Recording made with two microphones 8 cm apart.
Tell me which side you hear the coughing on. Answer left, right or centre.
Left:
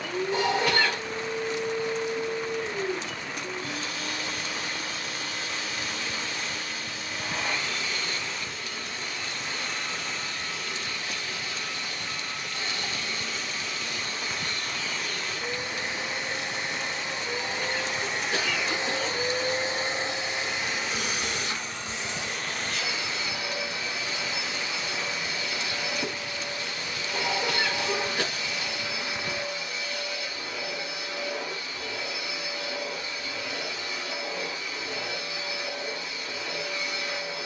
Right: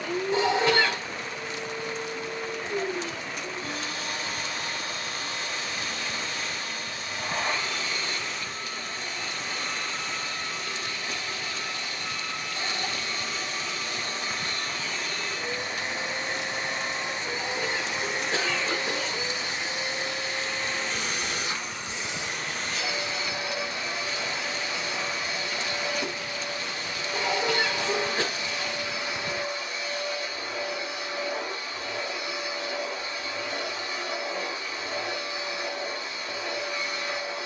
right.